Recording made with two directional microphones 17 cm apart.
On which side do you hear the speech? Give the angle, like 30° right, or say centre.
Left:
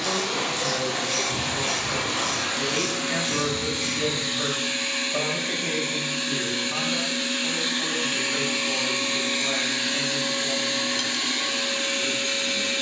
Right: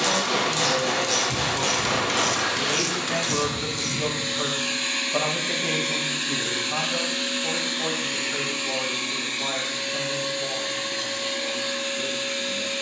10° right.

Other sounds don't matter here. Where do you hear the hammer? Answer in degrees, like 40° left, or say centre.
40° right.